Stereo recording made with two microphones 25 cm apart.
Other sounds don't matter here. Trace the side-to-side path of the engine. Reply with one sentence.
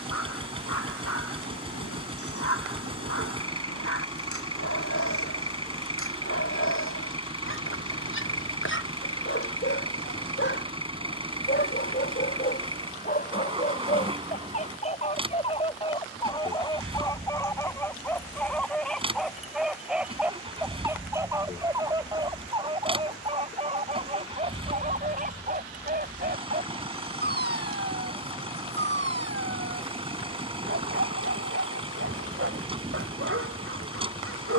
You can hear the engine stay put.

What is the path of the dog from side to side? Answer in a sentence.
You can hear the dog move to the right.